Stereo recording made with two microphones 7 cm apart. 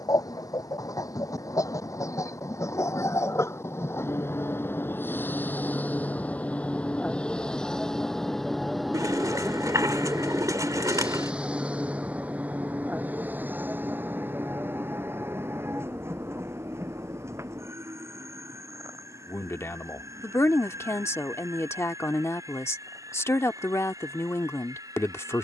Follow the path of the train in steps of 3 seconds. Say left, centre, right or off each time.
left, left, centre, centre, right, right, right, right, right.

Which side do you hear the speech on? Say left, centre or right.
left.